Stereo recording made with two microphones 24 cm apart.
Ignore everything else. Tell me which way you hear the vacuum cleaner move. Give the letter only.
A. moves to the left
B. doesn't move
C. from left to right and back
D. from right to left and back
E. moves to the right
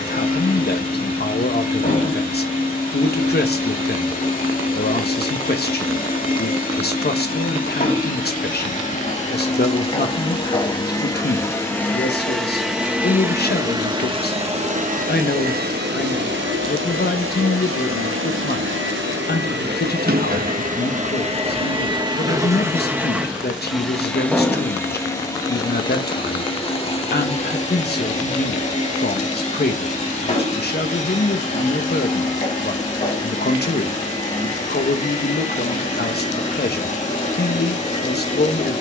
C.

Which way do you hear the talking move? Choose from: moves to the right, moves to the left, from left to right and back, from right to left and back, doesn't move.
doesn't move.